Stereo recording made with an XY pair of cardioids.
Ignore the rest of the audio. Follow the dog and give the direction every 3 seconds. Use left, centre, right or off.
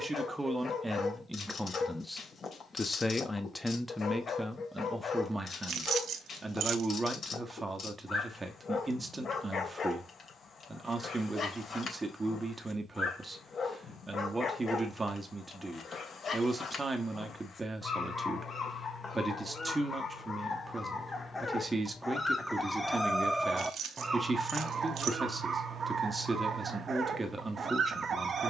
left, left, left, left, left, left, left, centre, right, right.